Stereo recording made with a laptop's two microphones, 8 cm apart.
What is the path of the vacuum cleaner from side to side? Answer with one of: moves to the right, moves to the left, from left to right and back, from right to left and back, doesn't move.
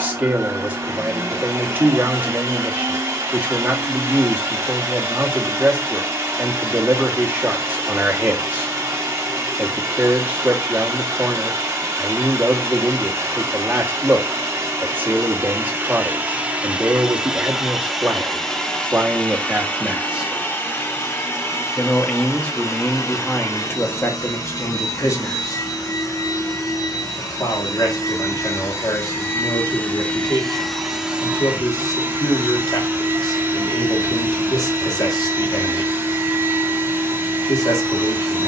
from right to left and back.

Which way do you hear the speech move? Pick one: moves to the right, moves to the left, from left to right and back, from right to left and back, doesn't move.
moves to the left.